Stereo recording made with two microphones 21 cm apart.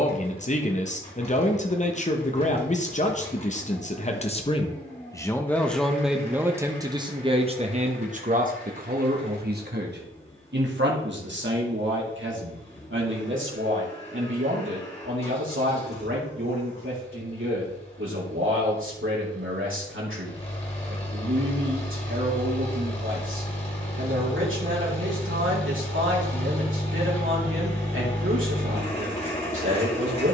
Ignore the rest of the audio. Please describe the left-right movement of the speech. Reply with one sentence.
In this clip you hear the speech travel towards the right.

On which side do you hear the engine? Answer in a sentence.
You can hear the engine on the left.